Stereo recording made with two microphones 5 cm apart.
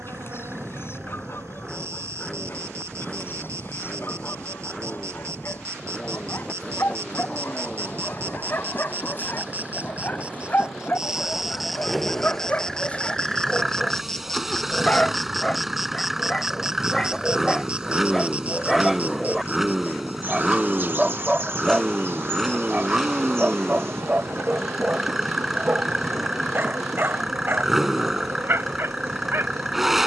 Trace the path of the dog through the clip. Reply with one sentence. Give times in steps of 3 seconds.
You can hear the dog on the left from 0 s, in the centre from 15 s and on the right from 21 s.